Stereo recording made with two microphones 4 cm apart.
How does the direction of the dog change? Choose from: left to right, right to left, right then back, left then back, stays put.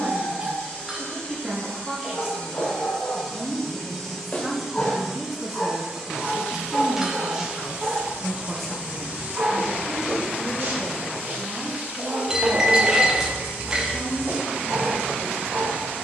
left to right.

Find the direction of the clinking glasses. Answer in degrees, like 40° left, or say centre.
20° right.